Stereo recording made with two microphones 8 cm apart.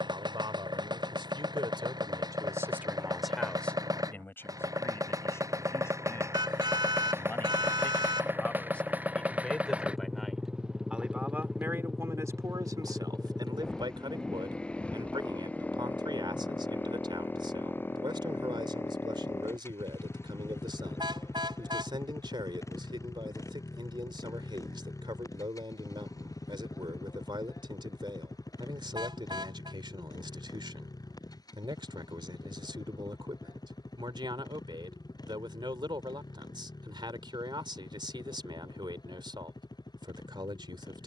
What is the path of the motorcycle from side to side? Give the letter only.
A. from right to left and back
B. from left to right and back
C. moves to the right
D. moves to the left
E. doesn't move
D.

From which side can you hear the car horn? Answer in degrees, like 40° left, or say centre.
70° right.